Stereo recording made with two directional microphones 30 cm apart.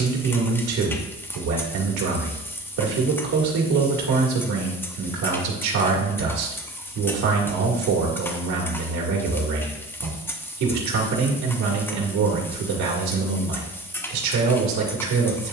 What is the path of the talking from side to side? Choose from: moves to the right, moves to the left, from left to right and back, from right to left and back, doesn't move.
doesn't move.